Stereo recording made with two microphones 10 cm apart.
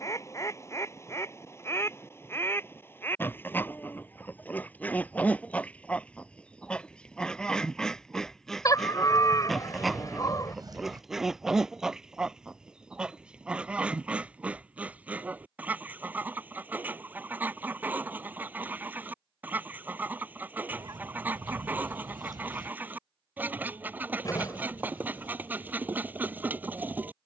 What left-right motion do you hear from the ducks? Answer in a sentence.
In this clip you hear the ducks travel towards the right.